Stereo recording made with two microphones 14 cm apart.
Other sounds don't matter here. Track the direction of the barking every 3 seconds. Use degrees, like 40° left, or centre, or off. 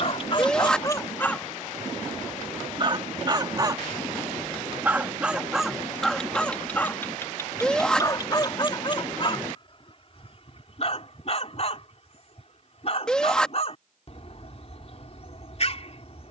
20° left, 20° right, 20° left, 40° left, 50° left, 50° left.